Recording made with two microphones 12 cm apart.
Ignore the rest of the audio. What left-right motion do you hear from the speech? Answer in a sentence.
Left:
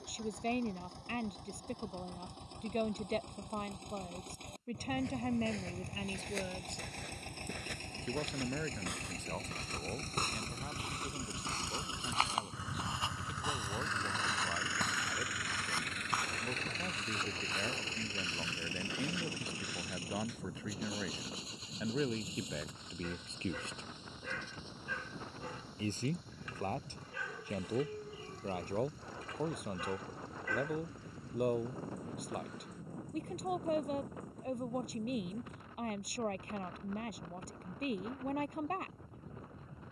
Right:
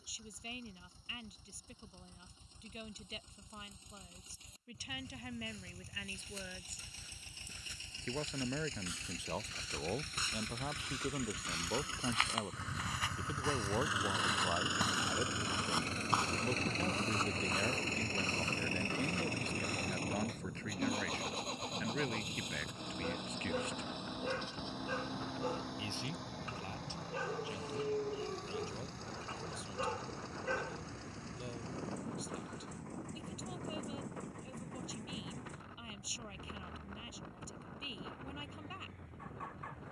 You can hear the speech move from left to right and back again.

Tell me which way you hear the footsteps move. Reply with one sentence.
In this clip you hear the footsteps move to the right.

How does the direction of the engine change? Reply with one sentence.
You can hear the engine move from left to right.